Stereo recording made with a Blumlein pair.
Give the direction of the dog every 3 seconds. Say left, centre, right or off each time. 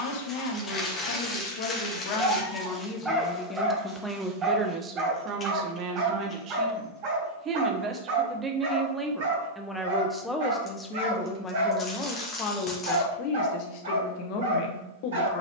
centre, right, right, right, right.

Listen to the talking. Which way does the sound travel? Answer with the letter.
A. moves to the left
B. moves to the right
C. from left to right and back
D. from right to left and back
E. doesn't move
C.